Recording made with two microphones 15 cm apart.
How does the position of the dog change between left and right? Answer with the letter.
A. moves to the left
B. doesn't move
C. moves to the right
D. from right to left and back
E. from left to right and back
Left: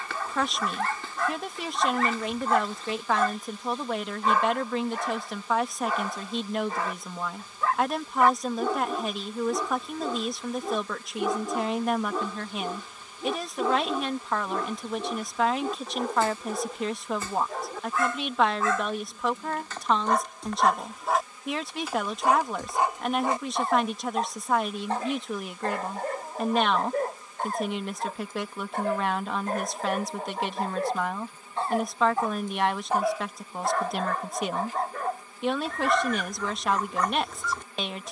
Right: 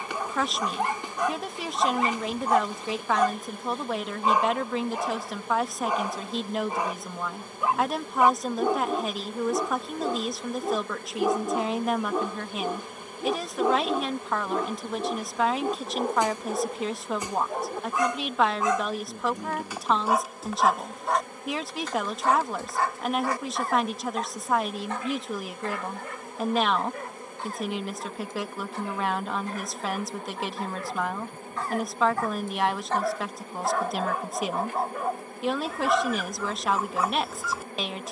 D.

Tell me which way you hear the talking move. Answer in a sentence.
You can hear the talking stay put.